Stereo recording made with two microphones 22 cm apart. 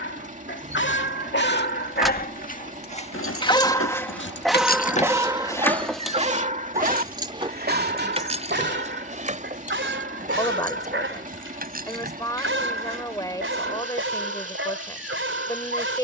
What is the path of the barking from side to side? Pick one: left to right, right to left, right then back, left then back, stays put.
left to right.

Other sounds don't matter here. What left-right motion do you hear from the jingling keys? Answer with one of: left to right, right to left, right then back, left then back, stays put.
left then back.